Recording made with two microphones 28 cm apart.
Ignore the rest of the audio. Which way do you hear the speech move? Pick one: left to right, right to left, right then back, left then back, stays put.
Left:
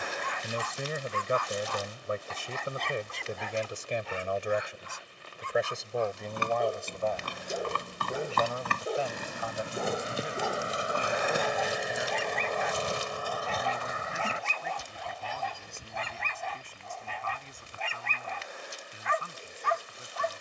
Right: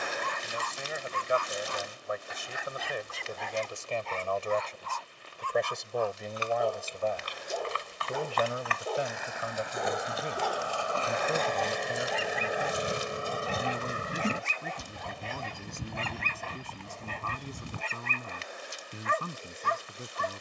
left to right.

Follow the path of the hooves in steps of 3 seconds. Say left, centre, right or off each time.
off, off, left, left, right, right, off.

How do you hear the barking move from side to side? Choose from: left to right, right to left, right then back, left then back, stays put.
left then back.